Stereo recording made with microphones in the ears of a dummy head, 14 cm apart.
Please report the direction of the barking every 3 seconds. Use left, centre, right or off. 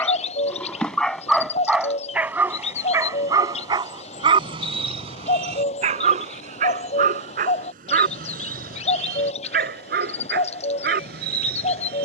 centre, right, right, right.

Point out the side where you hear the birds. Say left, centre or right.
left.